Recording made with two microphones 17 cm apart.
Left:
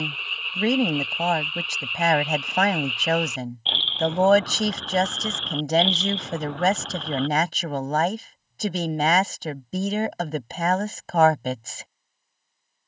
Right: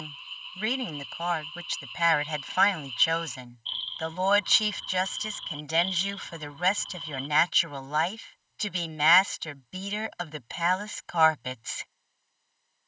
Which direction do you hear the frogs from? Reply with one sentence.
You can hear the frogs on the left.